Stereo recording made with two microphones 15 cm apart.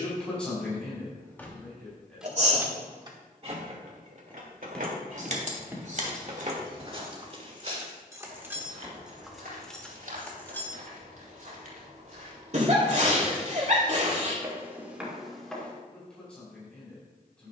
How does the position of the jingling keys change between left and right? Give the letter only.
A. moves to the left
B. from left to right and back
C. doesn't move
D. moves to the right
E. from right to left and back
B.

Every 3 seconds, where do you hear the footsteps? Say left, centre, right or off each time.
off, centre, right, right, right, centre.